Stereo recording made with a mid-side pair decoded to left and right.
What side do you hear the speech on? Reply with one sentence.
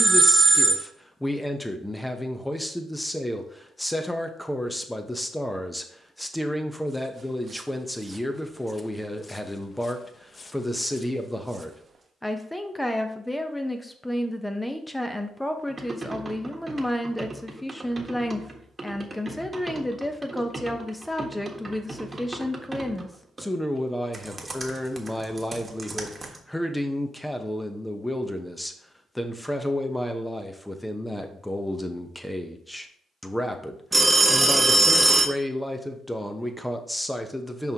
You can hear the speech in the centre.